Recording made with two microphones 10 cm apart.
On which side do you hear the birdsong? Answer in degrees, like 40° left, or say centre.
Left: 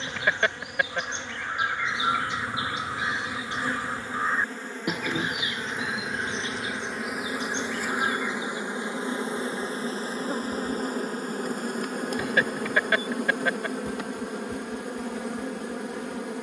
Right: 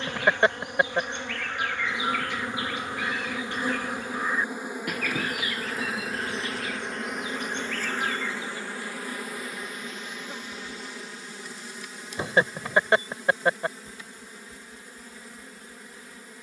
20° left.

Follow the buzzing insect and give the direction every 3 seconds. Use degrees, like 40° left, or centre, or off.
20° right, 10° right, 10° left, 40° left, 70° left, 80° left.